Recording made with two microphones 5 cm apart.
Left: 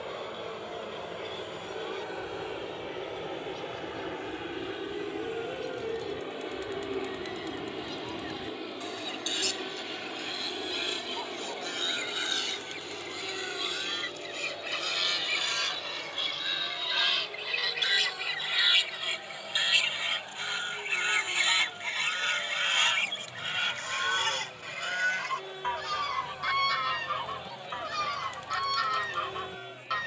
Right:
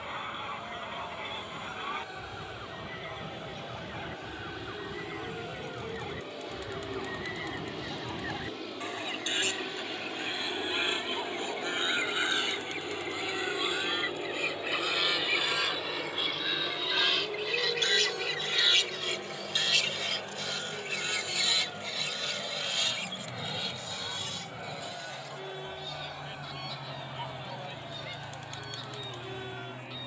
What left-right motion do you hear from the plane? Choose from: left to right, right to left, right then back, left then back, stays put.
left to right.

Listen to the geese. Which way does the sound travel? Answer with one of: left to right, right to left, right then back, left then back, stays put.
right to left.